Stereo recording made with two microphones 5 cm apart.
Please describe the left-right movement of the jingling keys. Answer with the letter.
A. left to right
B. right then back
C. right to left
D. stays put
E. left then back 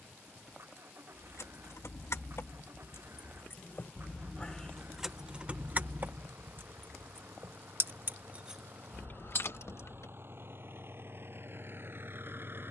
B.